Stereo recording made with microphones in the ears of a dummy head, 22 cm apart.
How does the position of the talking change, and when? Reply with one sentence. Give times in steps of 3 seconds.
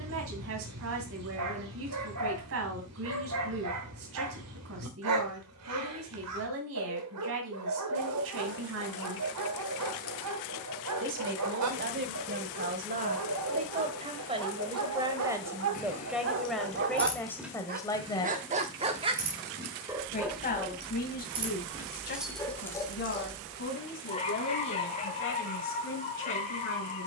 You can hear the talking on the right from 0 s, in the centre from 15 s and on the left from 18 s.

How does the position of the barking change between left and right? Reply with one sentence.
In this clip you hear the barking go from the right side to the left.